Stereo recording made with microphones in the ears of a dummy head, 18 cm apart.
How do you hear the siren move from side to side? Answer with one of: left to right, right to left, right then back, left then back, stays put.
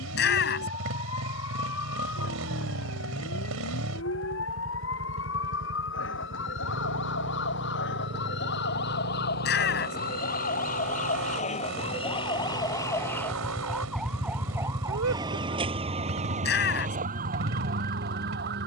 left to right.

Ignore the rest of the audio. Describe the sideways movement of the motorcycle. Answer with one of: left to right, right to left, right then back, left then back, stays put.
stays put.